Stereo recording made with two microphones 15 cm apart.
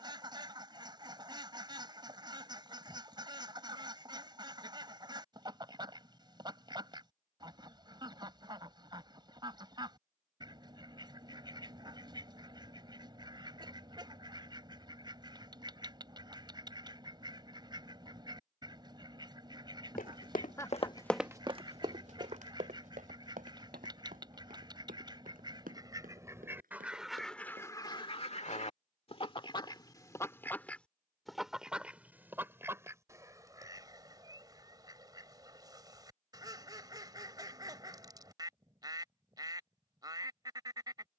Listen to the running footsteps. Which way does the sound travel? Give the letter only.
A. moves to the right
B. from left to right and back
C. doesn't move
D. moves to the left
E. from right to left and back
A.